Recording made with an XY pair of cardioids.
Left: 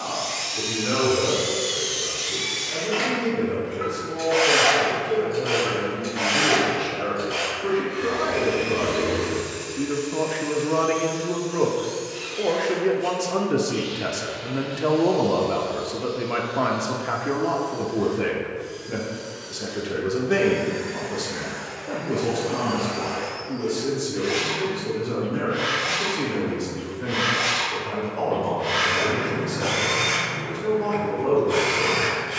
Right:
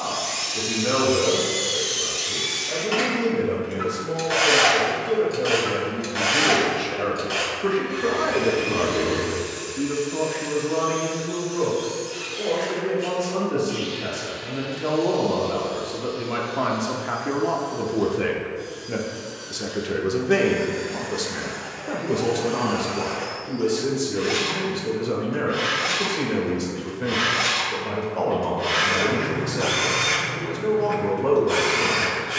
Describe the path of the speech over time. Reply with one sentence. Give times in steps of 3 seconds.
In this clip you hear the speech on the right from 0 s, on the left from 9 s, in the centre from 15 s and on the right from 18 s.